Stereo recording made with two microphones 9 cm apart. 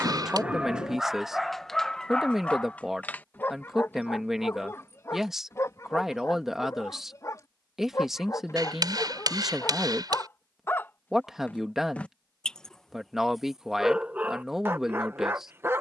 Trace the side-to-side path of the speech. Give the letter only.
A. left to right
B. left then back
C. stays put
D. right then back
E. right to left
C.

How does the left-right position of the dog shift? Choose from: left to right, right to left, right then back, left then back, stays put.
left then back.